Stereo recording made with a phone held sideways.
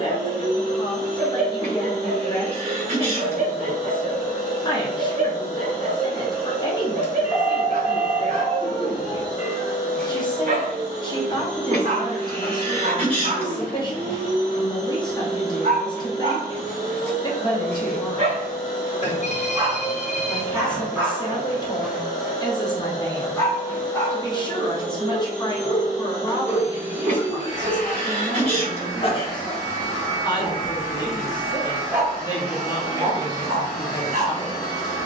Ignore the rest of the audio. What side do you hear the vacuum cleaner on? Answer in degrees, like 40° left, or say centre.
50° left.